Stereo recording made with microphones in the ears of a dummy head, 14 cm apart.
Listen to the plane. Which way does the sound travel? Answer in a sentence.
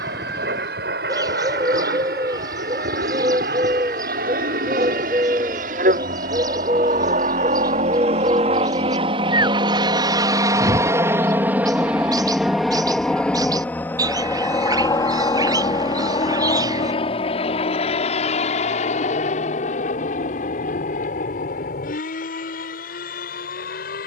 In this clip you hear the plane move to the left.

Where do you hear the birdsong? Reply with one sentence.
In this clip you hear the birdsong on the right.